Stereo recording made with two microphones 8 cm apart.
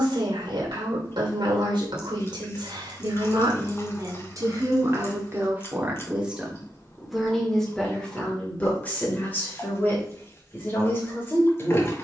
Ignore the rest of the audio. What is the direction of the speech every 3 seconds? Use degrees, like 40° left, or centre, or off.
70° right, 40° right, centre, 30° left.